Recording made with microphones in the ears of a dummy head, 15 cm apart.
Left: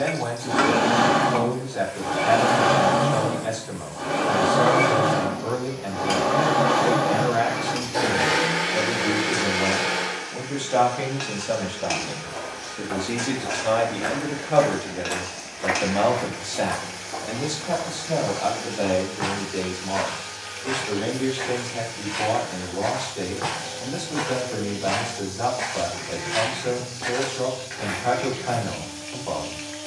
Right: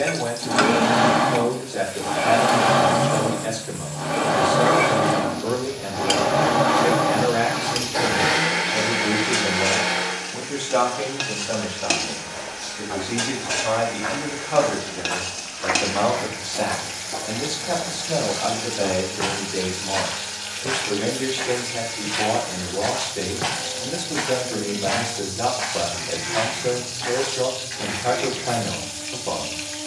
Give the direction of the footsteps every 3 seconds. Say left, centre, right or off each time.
off, off, off, off, left, centre, right, right, centre, left.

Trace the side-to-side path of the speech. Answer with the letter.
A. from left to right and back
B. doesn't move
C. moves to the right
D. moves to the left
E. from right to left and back
E.